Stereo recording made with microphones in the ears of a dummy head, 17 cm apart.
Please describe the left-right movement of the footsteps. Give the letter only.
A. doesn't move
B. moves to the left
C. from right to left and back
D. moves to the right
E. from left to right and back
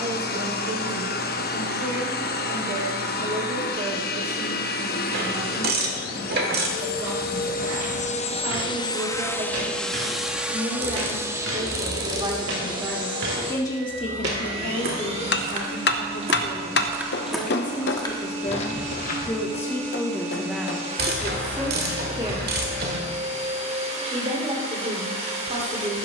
B.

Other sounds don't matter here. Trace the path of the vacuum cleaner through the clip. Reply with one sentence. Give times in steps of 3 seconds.
In this clip you hear the vacuum cleaner on the left from 0 s, in the centre from 9 s and on the right from 12 s.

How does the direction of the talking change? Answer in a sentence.
You can hear the talking go left and come back.